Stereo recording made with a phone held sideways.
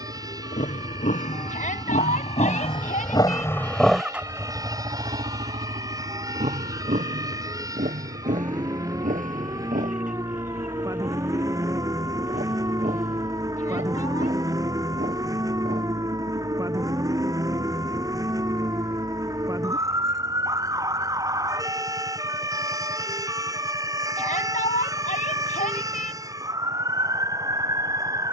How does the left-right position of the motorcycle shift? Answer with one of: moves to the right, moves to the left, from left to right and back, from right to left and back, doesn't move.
moves to the right.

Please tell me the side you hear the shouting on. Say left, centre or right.
left.